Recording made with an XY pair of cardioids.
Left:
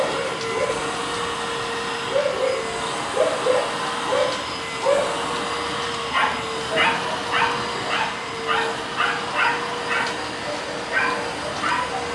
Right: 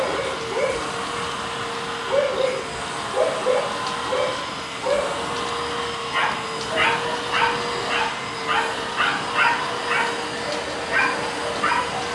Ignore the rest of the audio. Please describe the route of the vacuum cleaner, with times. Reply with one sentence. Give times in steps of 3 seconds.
In this clip you hear the vacuum cleaner on the left from 0 s, in the centre from 6 s and on the right from 9 s.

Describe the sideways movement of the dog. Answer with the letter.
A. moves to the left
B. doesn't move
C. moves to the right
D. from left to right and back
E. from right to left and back
E.